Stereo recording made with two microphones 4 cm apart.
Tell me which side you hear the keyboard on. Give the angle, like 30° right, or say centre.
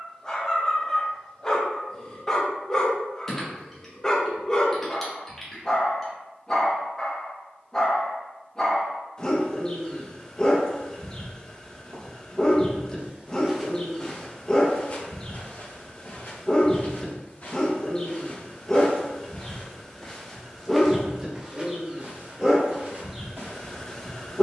10° left.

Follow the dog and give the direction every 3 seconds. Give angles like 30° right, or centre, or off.
20° left, 20° left, 20° left, 20° left, 20° left, 20° left, centre, 10° right.